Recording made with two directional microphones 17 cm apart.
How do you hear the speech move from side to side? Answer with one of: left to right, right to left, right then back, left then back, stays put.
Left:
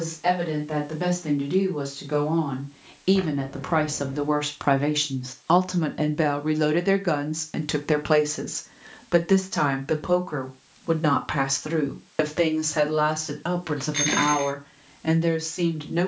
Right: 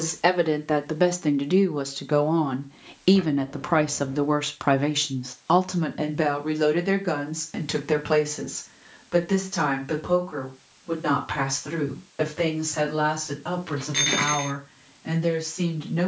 right to left.